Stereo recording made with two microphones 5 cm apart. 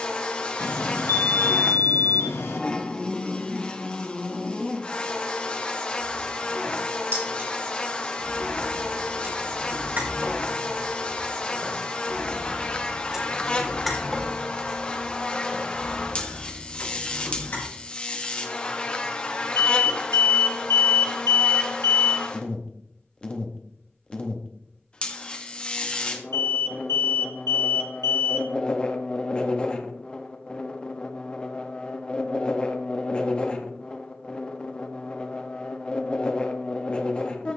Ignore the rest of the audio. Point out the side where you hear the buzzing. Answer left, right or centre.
left.